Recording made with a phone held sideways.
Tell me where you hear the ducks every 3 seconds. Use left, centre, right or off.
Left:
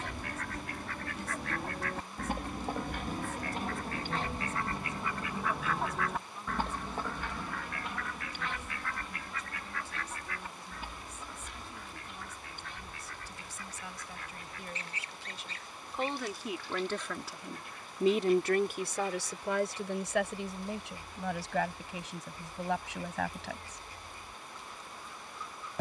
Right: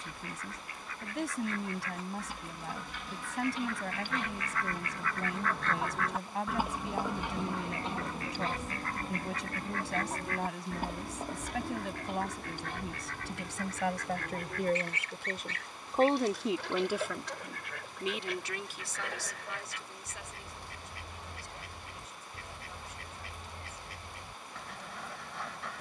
left, left, right, right, right, right, right, right, right.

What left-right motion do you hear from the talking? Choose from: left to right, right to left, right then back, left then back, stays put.
right to left.